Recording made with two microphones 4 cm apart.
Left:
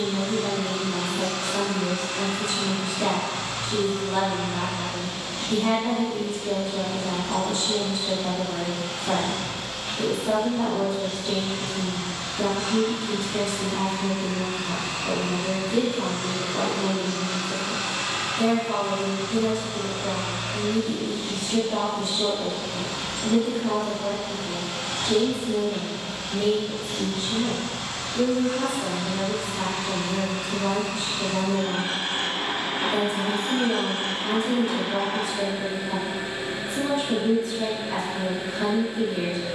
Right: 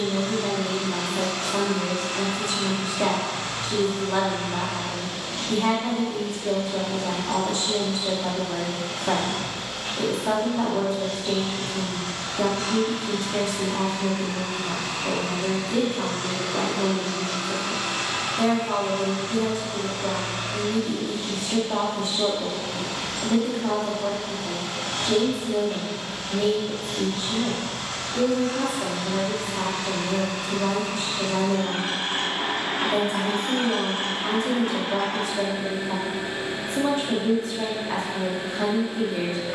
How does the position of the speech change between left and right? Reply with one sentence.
In this clip you hear the speech stay put.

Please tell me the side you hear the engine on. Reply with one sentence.
In this clip you hear the engine on the right.